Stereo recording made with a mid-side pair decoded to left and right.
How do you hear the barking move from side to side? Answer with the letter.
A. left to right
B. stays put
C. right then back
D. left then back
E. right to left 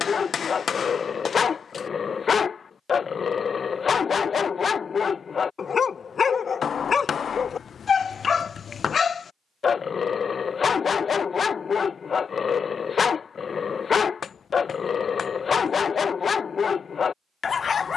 B.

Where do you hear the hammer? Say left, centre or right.
left.